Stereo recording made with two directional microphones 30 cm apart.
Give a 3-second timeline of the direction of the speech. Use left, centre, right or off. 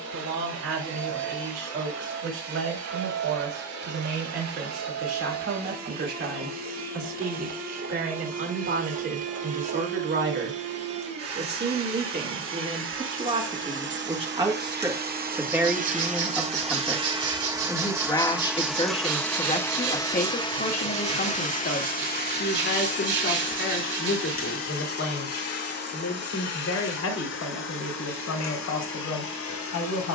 right, right, right, right, right, centre, left, left, left, left.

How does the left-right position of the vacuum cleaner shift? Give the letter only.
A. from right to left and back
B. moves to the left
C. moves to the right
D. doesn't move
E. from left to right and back
B.